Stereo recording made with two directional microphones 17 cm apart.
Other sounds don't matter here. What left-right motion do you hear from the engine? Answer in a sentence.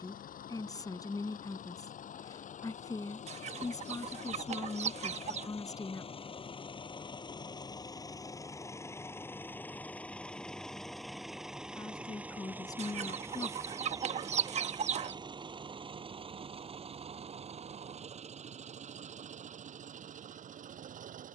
You can hear the engine travel towards the right.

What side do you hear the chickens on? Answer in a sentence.
In this clip you hear the chickens on the right.